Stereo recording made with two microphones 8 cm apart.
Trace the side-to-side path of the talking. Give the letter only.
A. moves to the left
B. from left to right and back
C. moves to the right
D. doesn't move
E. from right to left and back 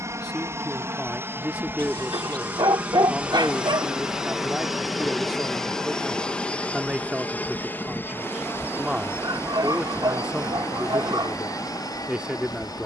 D.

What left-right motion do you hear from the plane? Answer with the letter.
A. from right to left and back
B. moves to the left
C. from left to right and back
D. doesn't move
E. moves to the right
B.